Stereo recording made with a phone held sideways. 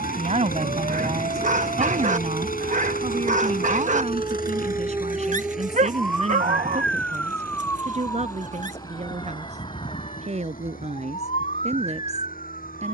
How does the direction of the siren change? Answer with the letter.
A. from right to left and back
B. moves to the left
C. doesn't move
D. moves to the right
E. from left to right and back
B.